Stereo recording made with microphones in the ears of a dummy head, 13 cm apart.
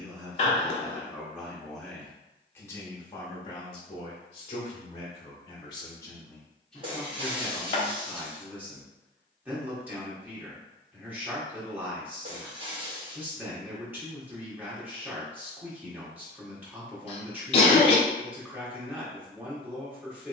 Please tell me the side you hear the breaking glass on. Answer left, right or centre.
right.